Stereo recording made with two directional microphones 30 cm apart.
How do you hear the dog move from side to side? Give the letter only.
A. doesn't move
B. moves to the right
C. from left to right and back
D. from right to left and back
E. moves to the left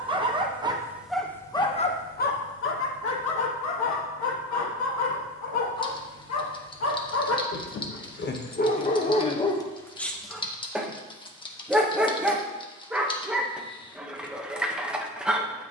D.